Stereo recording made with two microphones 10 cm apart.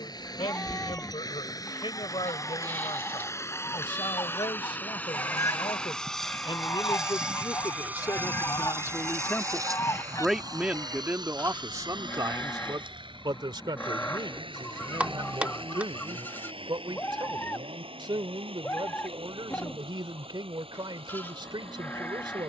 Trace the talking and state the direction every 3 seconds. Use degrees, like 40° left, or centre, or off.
70° left, 70° left, 50° left, 10° right, 50° right, 60° right, 60° right, 60° right.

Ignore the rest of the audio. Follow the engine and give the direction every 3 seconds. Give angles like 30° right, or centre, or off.
40° left, 20° left, 10° right, 50° right, 60° right, 70° right, 80° right, 80° right.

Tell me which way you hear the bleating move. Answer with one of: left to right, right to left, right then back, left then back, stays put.
stays put.